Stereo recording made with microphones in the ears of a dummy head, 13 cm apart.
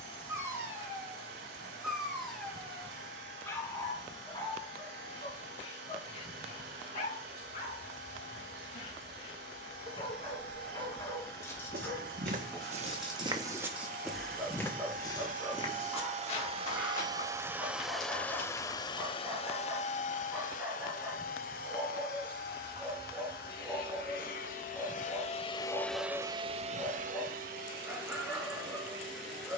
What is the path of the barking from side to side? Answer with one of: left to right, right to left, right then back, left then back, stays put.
left then back.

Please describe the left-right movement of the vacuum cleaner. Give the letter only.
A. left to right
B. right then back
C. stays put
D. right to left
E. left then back
E.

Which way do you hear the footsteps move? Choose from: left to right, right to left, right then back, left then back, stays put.
right to left.